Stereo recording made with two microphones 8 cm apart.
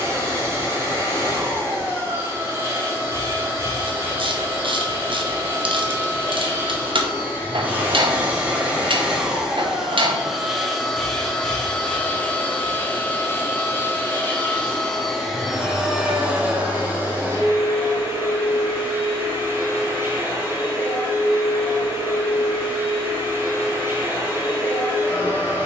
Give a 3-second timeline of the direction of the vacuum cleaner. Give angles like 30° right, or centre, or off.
30° right, 30° right, 20° right, centre, 20° left, 20° right, 30° right, 30° right, 30° right.